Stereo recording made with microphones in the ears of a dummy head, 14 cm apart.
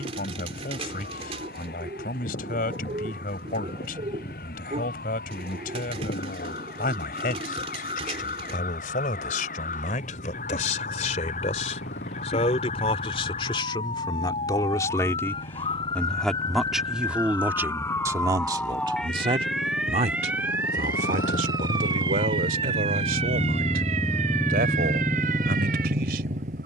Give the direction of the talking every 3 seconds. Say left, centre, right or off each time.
left, left, left, left, left, centre, right, right, right.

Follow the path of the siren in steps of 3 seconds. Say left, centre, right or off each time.
left, left, left, left, left, left, centre, right, right.